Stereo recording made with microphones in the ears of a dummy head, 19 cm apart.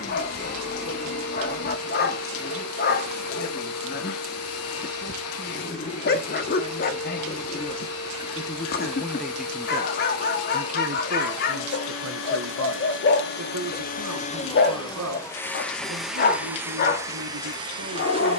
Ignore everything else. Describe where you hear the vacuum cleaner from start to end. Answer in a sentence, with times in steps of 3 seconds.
You can hear the vacuum cleaner on the left from 0 s and in the centre from 15 s.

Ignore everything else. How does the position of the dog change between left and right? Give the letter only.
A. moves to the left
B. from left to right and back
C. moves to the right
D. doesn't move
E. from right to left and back
D.